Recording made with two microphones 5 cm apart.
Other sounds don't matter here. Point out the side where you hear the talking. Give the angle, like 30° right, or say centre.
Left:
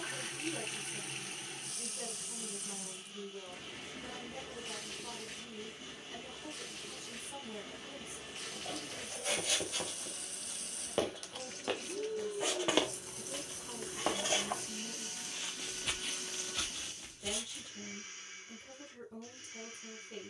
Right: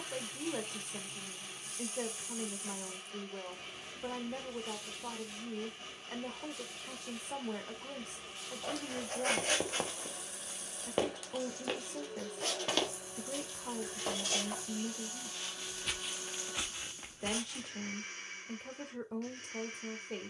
60° right.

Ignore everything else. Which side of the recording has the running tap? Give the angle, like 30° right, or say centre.
60° left.